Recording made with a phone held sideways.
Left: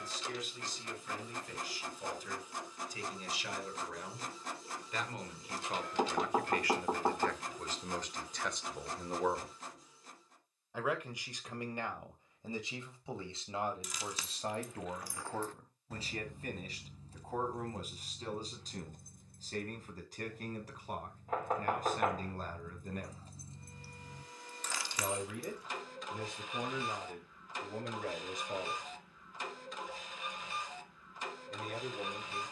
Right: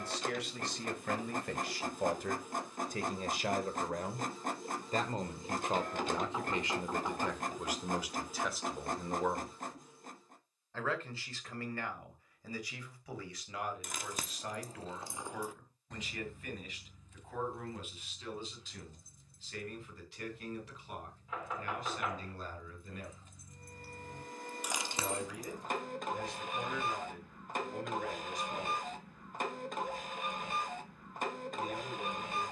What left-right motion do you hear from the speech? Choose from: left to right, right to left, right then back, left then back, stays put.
right to left.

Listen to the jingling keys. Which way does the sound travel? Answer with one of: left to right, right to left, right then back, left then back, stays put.
left then back.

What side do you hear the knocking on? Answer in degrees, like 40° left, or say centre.
50° left.